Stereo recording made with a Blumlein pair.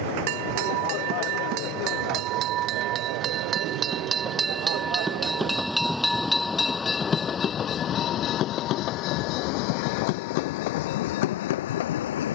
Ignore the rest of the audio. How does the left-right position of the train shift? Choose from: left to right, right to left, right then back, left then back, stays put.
right to left.